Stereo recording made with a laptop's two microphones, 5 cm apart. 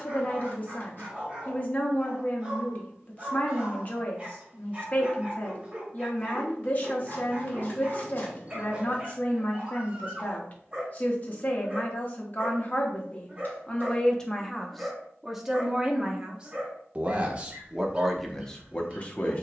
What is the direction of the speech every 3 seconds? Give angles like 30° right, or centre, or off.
40° left, 40° left, 40° left, 40° left, 30° left, 20° right, 20° left.